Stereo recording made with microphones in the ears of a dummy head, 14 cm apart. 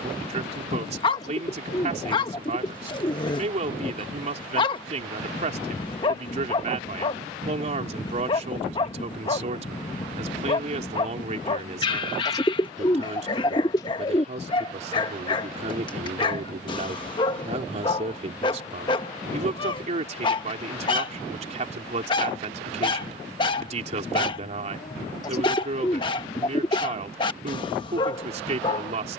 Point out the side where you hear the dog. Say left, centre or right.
left.